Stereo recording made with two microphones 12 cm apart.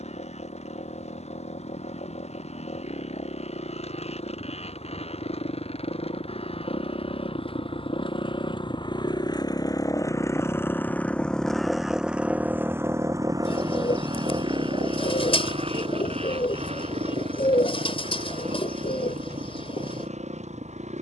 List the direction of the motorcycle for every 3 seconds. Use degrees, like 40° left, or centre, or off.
70° left, 60° left, 50° left, 20° left, 30° right, 60° right, 70° right.